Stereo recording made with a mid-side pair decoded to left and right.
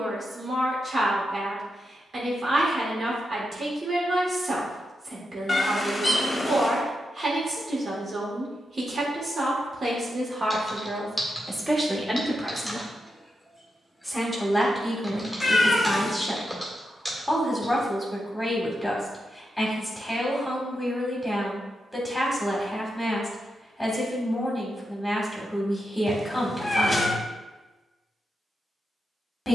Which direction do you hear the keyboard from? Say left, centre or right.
centre.